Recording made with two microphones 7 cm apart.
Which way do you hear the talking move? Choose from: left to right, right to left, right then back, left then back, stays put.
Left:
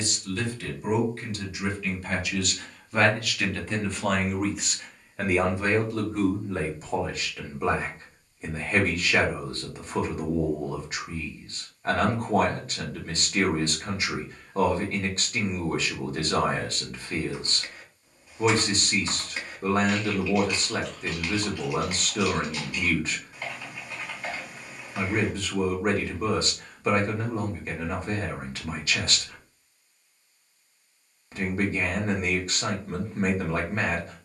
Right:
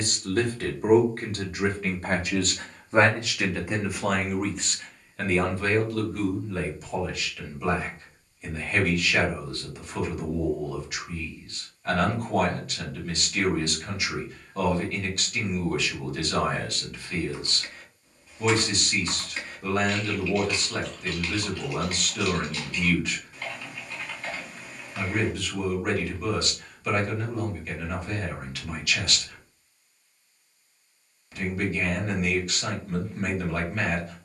right to left.